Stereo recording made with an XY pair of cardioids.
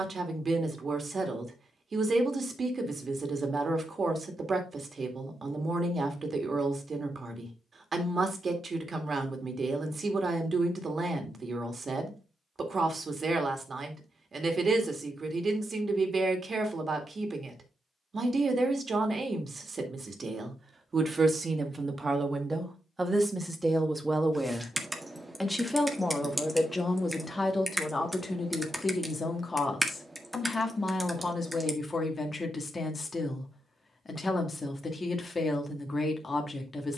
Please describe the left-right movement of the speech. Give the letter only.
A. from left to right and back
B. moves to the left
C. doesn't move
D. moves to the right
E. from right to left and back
B.